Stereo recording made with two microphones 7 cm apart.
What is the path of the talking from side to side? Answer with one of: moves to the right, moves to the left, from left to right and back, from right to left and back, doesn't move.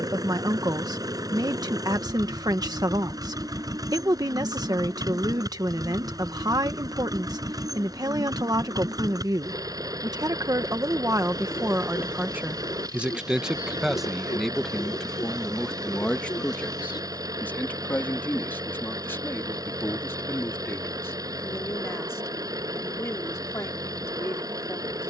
moves to the left.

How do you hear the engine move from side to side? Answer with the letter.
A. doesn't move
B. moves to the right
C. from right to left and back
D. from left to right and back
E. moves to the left
A.